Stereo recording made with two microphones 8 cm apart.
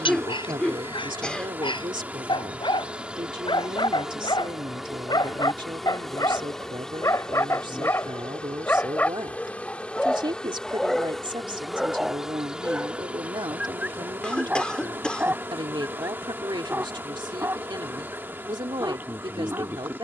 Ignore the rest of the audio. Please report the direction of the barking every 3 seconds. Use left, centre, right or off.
left, left, left, centre, centre, right, right.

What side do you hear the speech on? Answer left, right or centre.
right.